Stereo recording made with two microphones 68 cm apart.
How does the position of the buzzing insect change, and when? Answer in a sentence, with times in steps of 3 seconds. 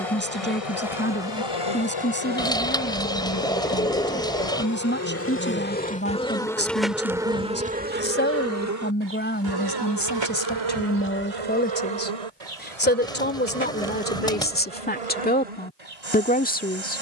You can hear the buzzing insect on the left from 0 s, in the centre from 6 s and on the right from 9 s.